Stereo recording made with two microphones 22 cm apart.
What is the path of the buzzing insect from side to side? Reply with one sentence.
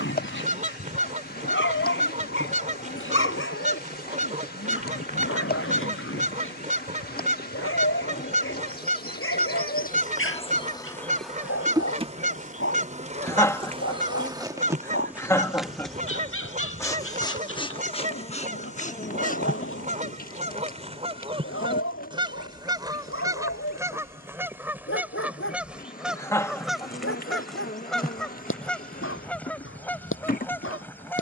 You can hear the buzzing insect go right and come back.